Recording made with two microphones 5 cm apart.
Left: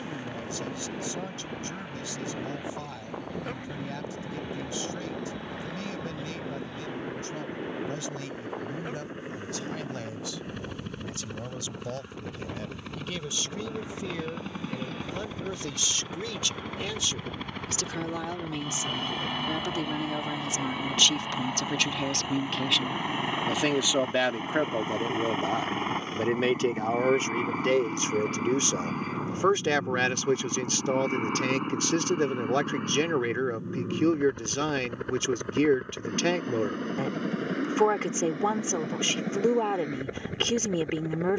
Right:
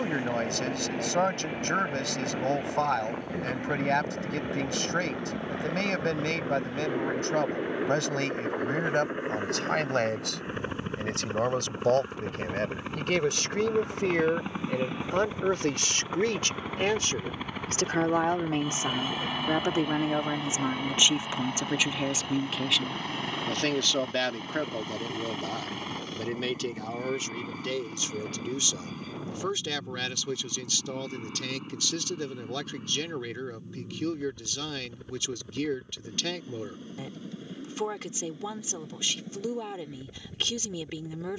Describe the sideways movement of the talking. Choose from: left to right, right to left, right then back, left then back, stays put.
right to left.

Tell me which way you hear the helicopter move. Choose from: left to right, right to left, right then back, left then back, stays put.
right to left.